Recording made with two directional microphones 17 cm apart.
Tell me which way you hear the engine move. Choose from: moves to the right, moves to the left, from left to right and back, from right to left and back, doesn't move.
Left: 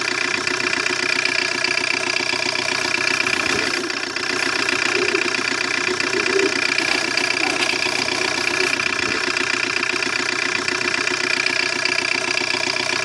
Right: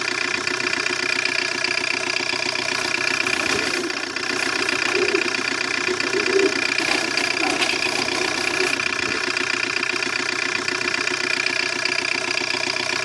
doesn't move.